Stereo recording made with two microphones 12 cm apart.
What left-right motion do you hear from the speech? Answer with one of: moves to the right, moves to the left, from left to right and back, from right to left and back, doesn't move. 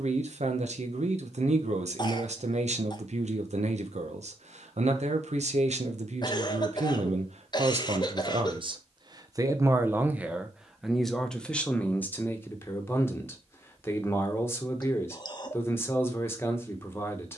moves to the left.